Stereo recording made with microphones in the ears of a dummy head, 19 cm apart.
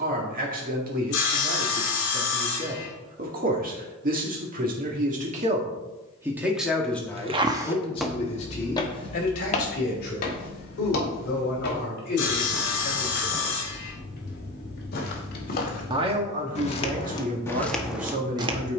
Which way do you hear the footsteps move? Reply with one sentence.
You can hear the footsteps move from right to left and back again.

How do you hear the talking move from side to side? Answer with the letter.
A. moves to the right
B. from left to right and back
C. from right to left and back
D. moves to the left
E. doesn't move
C.